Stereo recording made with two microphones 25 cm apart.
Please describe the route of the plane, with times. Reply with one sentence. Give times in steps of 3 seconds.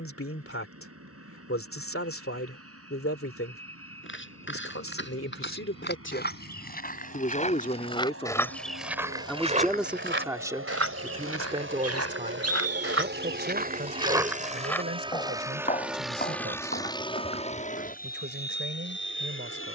In this clip you hear the plane on the right from 0 s, in the centre from 15 s and on the left from 18 s.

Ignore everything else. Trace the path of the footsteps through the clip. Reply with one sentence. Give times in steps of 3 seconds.
You can hear the footsteps not at all from 0 s, on the left from 3 s, on the right from 9 s, on the left from 15 s and not at all from 18 s.